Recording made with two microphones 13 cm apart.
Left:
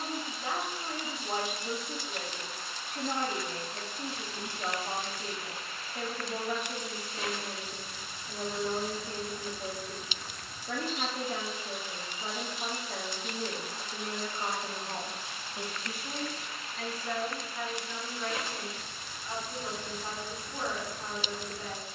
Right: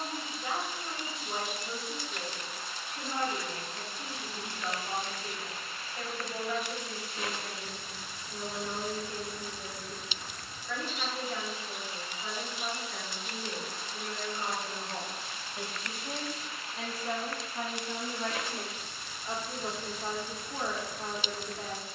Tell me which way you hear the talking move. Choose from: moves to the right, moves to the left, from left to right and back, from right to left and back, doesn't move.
moves to the right.